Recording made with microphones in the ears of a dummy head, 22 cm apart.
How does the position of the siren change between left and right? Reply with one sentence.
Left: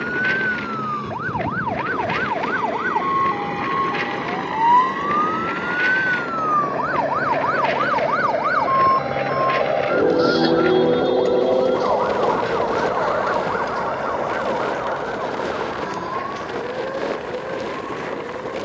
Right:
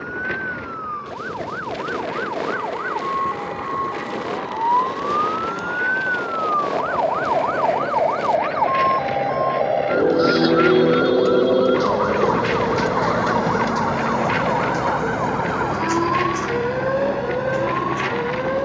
You can hear the siren go from the left side to the right.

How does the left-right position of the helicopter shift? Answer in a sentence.
In this clip you hear the helicopter travel towards the right.